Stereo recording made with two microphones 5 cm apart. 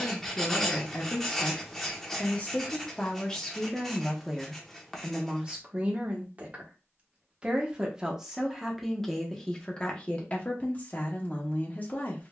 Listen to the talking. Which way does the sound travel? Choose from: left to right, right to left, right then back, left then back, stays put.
right then back.